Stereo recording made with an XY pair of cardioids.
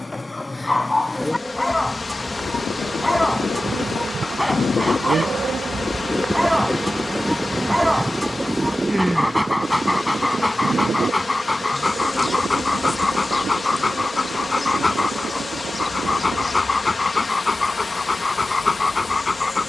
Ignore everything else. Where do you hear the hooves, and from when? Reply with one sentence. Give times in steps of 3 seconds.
In this clip you hear the hooves on the left from 0 s, in the centre from 6 s, on the right from 9 s and not at all from 18 s.